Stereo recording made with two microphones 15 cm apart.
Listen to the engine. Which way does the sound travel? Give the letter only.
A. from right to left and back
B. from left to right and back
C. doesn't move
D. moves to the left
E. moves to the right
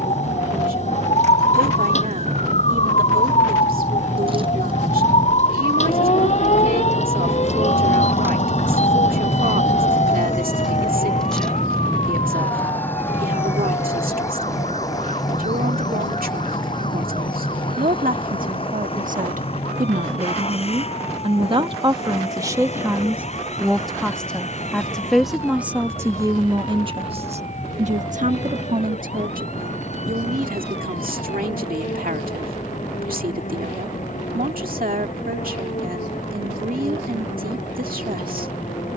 D.